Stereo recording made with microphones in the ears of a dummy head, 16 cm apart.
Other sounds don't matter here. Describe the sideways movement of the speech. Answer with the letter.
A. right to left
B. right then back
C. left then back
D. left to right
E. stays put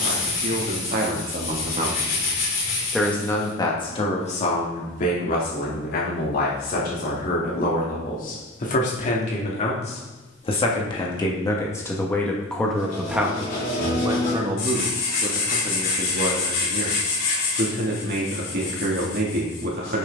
C.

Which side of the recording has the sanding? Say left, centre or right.
left.